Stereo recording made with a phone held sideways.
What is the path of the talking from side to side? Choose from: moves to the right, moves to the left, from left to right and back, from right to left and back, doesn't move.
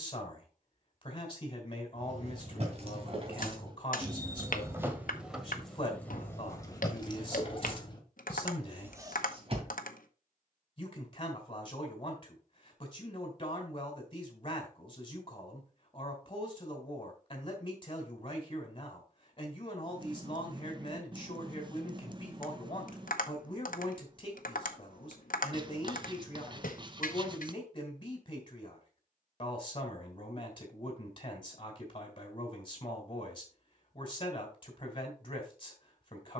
doesn't move.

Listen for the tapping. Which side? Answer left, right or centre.
left.